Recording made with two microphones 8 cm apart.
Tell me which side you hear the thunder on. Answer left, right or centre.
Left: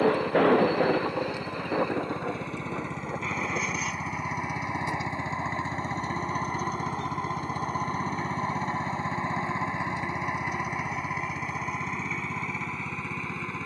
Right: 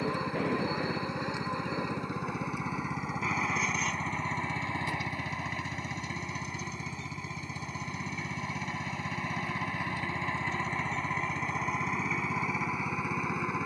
left.